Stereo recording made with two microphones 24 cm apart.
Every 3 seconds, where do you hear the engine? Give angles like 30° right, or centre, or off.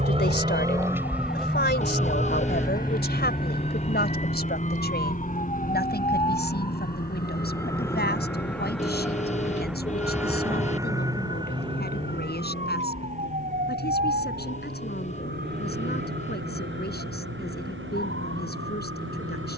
centre, 30° left, 40° left, 50° left, 50° left, 60° left, 60° left.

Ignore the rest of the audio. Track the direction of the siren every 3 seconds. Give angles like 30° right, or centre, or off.
40° left, 30° left, 10° left, 10° right, 30° right, 50° right, 60° right.